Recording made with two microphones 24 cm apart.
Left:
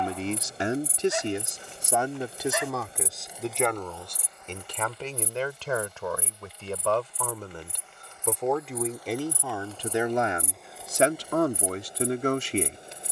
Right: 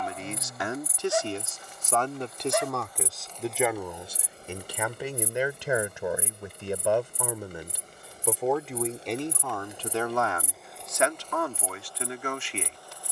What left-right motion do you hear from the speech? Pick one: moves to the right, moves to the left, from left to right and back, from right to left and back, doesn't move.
from left to right and back.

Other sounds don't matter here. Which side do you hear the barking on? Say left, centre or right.
right.